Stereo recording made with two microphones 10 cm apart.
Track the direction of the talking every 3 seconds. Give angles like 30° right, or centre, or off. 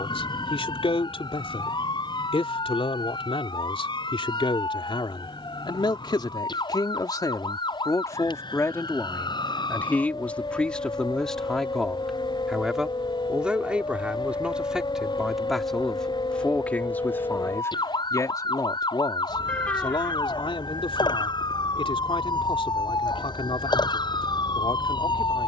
60° left, 60° left, 40° left, 10° left, 10° right, 10° left, 50° left, 60° left, 60° left.